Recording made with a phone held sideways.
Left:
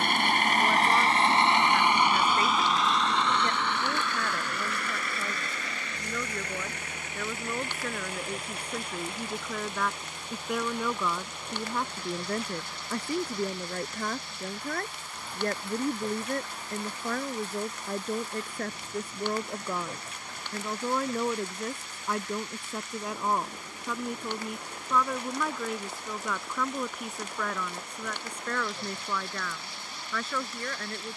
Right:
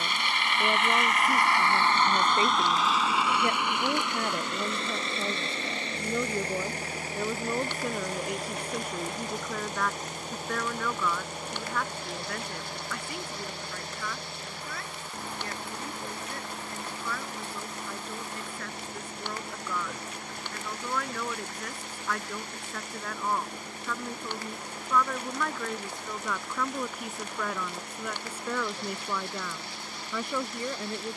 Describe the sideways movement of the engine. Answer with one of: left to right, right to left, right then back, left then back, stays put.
left to right.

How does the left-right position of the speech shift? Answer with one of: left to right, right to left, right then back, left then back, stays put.
left then back.